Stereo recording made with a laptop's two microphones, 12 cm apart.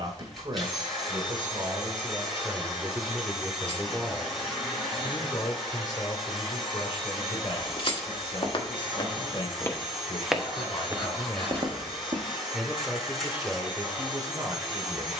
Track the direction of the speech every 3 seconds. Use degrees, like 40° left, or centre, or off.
30° right, 10° left, 50° left, 40° left, 20° right.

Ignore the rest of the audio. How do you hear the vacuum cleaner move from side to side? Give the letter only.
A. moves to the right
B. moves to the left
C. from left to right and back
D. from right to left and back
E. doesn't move
E.